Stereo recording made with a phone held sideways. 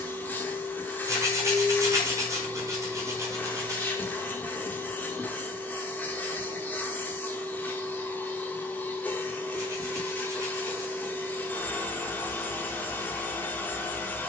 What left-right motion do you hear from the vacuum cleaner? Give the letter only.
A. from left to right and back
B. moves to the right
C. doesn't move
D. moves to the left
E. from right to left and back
C.